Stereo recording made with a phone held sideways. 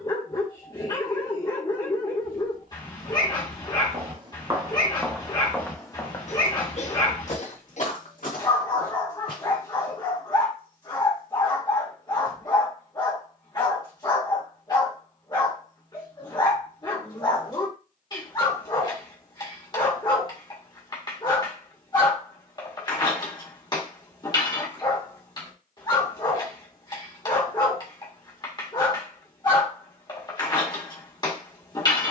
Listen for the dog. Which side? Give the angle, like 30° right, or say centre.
30° left.